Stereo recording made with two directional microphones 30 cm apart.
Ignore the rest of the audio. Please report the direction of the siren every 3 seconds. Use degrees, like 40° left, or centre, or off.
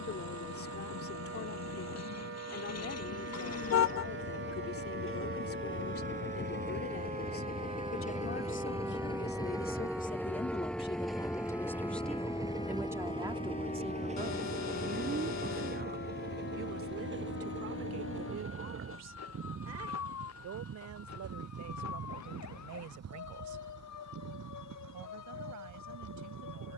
50° right, 40° right, 20° right, centre, 20° left, 40° left, 50° left, 60° left, 60° left.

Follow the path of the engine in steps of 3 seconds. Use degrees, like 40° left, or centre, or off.
60° left, 40° left, 30° left, centre, 20° right, 30° right, 40° right, 50° right, 60° right.